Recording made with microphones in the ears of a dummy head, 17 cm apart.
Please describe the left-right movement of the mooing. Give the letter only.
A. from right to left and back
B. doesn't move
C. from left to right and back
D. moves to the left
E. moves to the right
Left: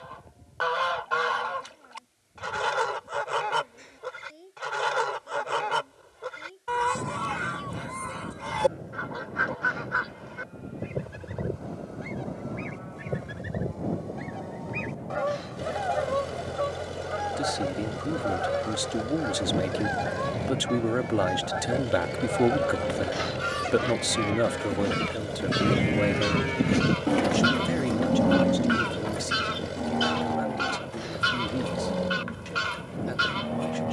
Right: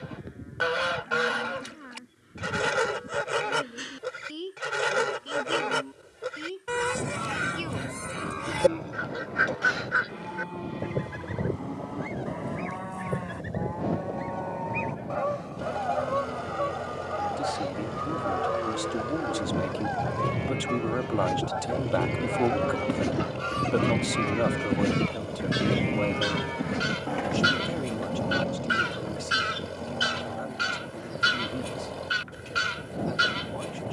D.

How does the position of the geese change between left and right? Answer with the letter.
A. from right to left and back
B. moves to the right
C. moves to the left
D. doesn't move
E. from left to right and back
A.